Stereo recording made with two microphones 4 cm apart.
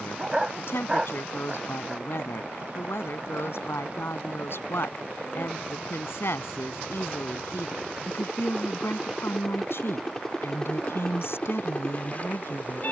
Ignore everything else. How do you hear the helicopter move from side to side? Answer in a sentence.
You can hear the helicopter move to the left.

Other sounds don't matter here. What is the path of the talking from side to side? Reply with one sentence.
You can hear the talking stay put.